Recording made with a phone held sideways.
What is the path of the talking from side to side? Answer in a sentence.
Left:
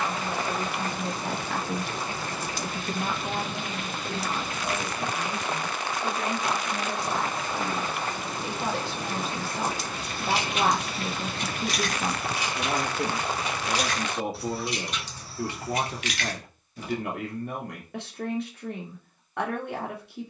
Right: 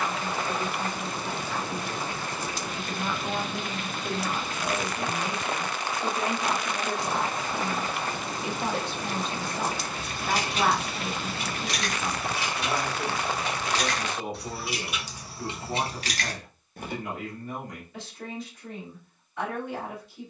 You can hear the talking go right and come back.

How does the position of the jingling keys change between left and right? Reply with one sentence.
In this clip you hear the jingling keys go left and come back.